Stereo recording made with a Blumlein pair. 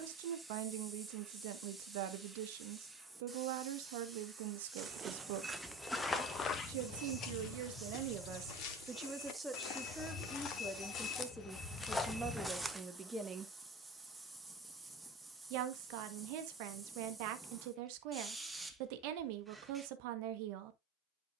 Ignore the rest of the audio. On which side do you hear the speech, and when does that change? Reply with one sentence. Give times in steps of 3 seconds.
You can hear the speech on the right from 0 s, in the centre from 9 s and on the right from 15 s.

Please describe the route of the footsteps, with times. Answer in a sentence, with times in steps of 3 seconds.
In this clip you hear the footsteps not at all from 0 s, in the centre from 3 s, on the left from 6 s, in the centre from 12 s and not at all from 15 s.